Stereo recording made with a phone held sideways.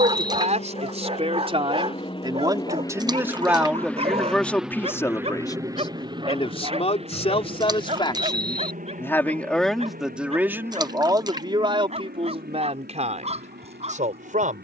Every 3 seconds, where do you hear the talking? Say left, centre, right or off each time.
right, centre, left, centre, right.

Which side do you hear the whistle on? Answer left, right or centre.
centre.